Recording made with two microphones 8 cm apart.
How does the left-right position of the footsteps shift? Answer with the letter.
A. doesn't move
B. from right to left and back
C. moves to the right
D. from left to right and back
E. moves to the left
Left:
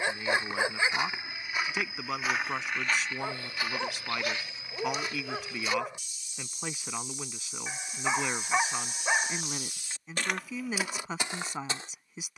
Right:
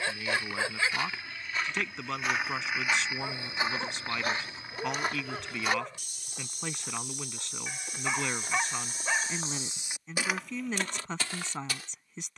D.